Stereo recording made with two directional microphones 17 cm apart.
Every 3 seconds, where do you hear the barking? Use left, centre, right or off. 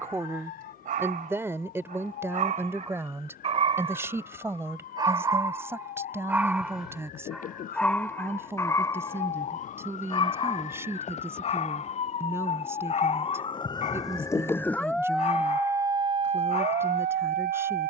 right, right, centre, left, left, left.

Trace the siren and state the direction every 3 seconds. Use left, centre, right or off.
left, left, left, left, left, right.